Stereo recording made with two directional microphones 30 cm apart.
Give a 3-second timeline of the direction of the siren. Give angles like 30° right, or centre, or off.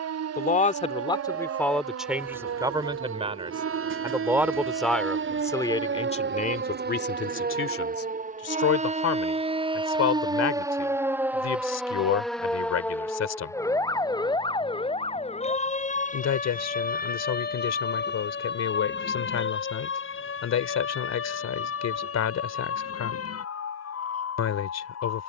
60° right, 50° right, 30° right, 10° right, 10° left, 30° left, 40° left, 50° left, 50° left.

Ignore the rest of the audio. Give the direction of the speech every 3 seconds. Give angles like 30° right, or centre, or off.
10° left, centre, 40° left, 60° left, 60° left, 60° left, 60° left, 60° left, 60° left.